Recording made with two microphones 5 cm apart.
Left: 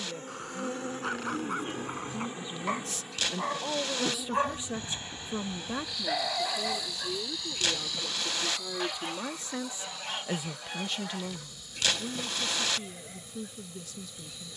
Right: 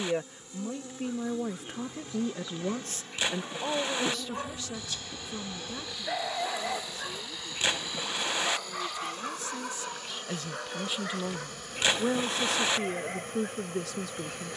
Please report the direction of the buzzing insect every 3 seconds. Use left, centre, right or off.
left, centre, right, right, right.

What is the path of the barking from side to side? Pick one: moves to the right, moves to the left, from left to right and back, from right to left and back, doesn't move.
moves to the right.